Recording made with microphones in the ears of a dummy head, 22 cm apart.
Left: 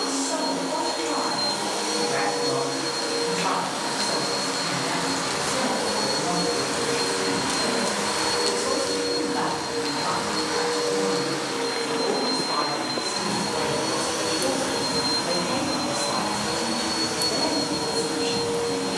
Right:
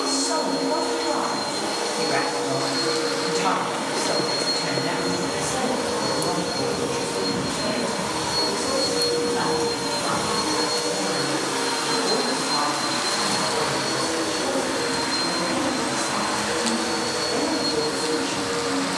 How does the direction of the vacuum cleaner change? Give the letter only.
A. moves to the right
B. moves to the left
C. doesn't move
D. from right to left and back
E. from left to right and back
E.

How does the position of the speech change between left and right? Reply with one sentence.
In this clip you hear the speech move from right to left.